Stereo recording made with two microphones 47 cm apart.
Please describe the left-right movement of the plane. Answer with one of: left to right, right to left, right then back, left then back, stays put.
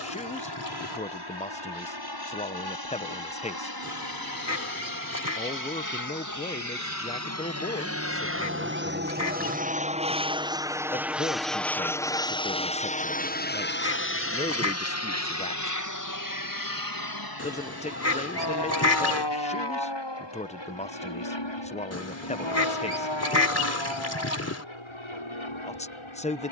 right to left.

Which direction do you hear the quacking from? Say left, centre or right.
left.